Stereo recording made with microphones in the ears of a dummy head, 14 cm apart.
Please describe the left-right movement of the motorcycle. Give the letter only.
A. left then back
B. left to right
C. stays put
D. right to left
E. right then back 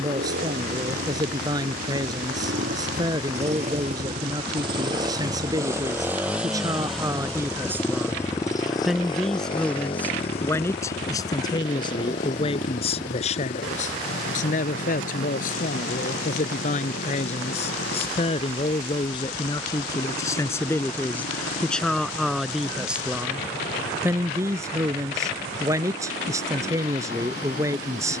D.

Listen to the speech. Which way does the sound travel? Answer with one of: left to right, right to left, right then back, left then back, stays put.
left then back.